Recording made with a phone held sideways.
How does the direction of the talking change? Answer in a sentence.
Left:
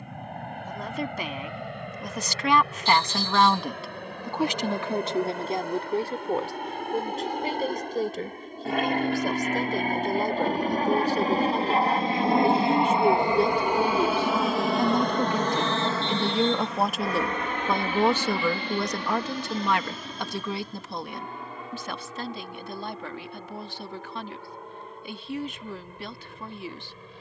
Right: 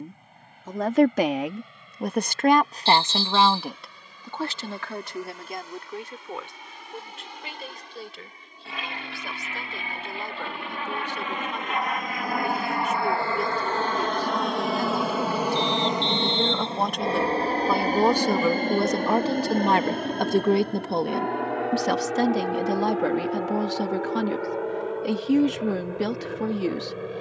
You can hear the talking go left and come back.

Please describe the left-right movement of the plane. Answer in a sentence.
You can hear the plane go from the left side to the right.